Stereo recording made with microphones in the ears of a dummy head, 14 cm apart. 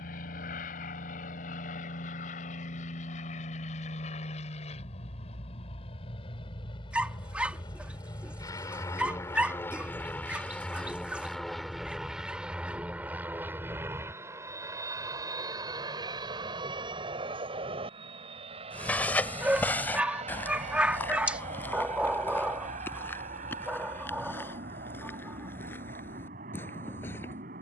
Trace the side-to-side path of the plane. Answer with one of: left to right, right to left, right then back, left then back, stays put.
left to right.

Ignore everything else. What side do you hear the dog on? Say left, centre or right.
centre.